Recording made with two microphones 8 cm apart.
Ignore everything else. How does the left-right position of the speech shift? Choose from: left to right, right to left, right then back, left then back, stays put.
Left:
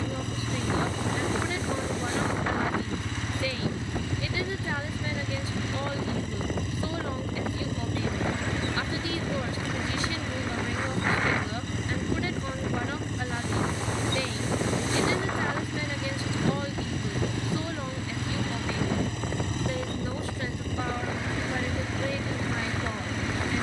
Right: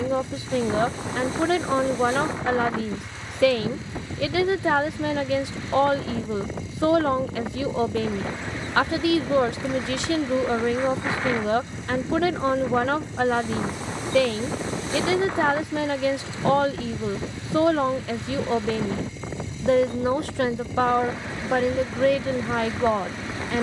stays put.